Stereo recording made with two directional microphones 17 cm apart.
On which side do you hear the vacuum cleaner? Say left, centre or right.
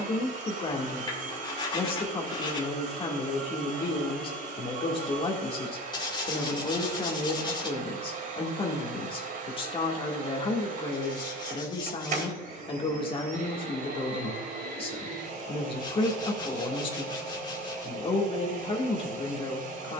right.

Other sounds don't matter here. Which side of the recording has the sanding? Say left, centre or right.
left.